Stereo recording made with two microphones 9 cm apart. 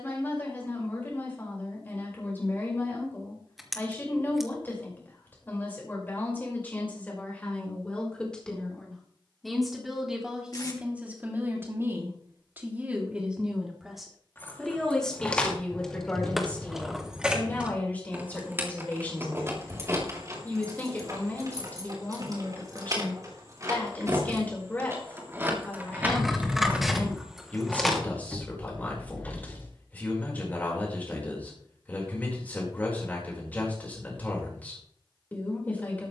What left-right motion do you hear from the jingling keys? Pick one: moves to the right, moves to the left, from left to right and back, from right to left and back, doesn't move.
from left to right and back.